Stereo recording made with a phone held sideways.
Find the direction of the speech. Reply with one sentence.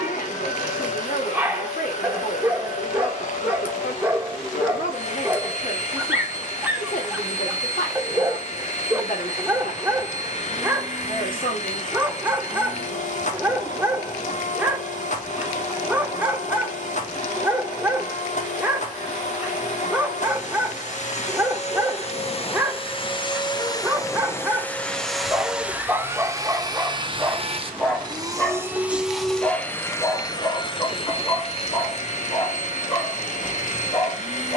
In this clip you hear the speech on the left.